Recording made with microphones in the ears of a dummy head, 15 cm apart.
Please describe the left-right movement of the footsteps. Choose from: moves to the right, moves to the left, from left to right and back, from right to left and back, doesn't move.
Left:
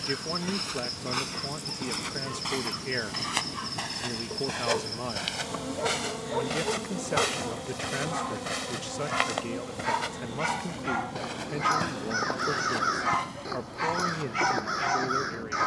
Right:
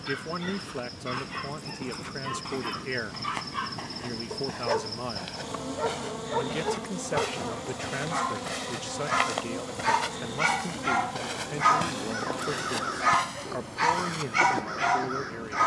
moves to the right.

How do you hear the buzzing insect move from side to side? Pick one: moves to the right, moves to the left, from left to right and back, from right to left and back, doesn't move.
moves to the right.